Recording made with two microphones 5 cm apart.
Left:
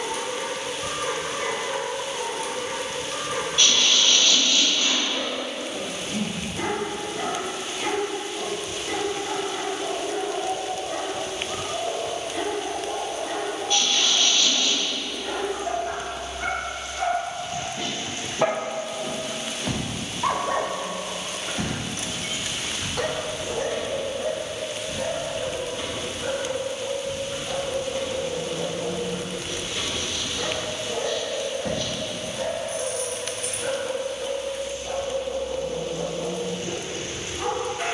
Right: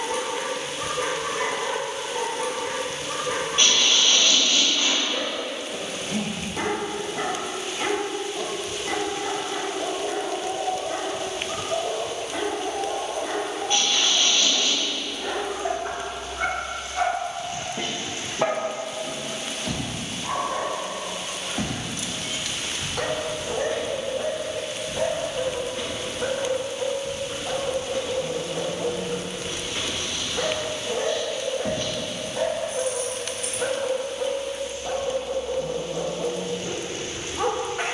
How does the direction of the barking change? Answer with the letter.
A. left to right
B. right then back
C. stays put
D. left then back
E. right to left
D.